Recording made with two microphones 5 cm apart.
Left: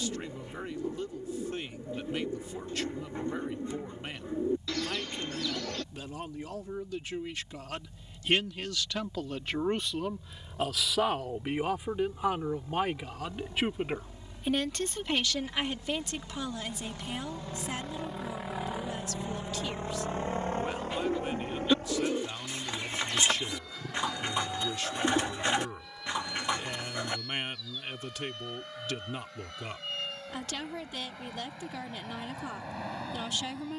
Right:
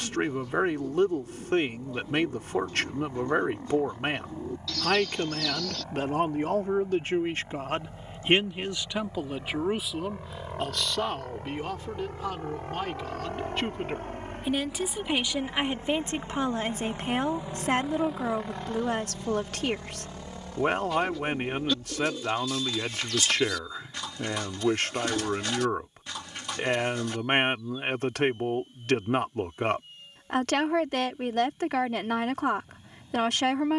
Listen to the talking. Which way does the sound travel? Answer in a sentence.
You can hear the talking go left and come back.